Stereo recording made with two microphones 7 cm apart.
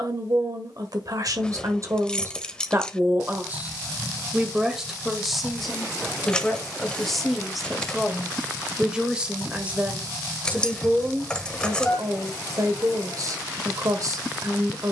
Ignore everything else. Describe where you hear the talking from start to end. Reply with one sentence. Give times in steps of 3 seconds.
You can hear the talking on the right from 0 s, in the centre from 3 s and on the right from 9 s.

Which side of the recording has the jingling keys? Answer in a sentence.
You can hear the jingling keys in the centre.